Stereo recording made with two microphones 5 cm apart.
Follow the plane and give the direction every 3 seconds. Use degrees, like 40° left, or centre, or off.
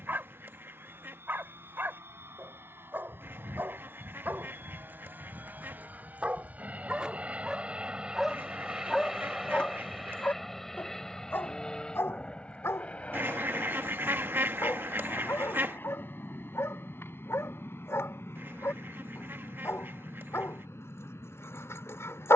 60° right, 50° right, 20° right, 10° left, 30° left, 40° left, 50° left, 60° left.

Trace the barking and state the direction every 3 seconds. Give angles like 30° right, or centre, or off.
50° right, 40° right, 10° right, 40° left, 70° left, 70° left, 70° left, 70° left.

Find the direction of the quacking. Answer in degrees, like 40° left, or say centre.
50° right.